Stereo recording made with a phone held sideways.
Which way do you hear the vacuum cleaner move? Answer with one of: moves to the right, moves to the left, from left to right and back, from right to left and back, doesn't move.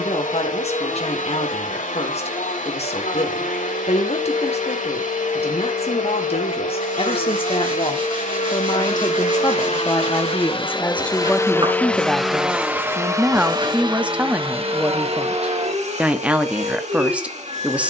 moves to the right.